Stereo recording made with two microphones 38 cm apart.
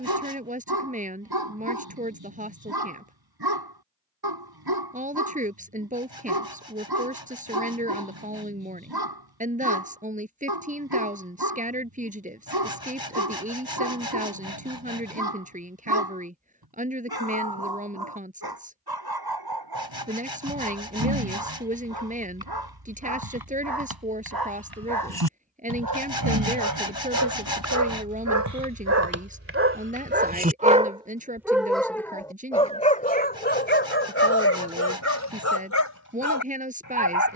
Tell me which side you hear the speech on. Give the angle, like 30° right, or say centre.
20° right.